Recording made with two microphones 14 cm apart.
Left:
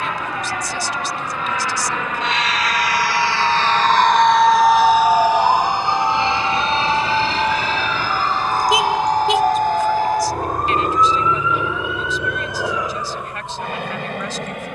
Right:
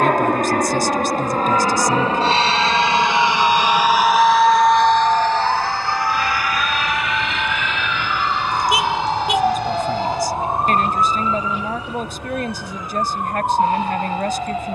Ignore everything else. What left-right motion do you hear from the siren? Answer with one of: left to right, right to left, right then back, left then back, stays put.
left to right.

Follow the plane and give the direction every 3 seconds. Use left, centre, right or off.
right, centre, left, left, left.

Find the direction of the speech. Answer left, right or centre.
right.